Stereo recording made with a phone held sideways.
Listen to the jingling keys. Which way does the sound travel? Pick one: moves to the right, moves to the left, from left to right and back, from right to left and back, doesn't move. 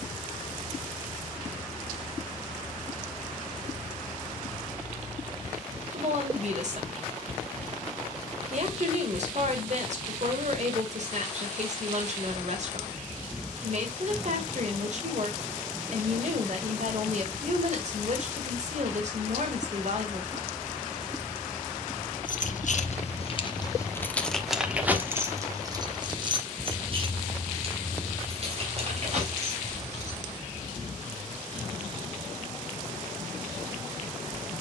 moves to the right.